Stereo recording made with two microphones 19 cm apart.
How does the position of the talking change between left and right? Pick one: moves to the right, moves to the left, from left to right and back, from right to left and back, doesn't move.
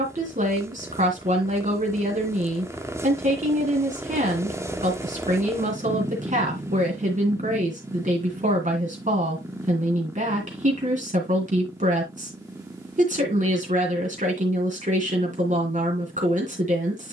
doesn't move.